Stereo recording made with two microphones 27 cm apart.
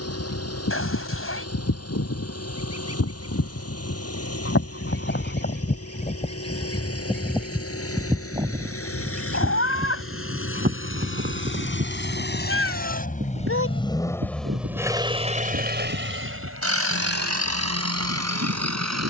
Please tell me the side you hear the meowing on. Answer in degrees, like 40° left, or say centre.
60° left.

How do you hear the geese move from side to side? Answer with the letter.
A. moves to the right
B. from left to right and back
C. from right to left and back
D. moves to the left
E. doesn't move
A.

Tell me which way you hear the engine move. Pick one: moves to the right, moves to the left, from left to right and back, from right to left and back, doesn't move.
moves to the right.